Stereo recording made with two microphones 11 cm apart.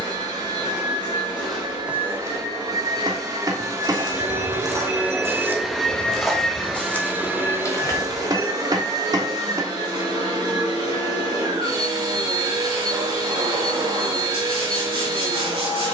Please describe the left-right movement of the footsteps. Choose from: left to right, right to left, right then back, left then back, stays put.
right then back.